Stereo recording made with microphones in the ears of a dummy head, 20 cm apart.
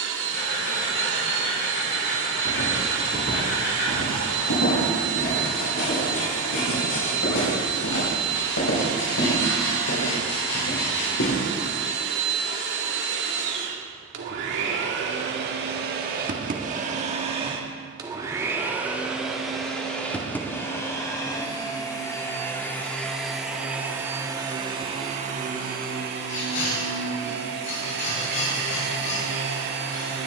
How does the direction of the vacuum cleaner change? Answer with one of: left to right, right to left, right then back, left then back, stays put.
left then back.